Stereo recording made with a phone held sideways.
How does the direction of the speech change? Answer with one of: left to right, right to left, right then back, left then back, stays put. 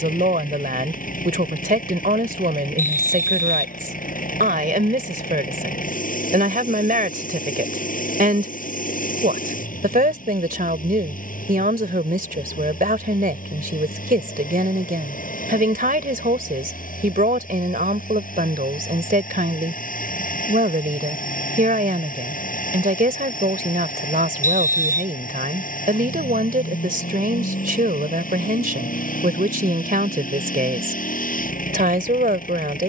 stays put.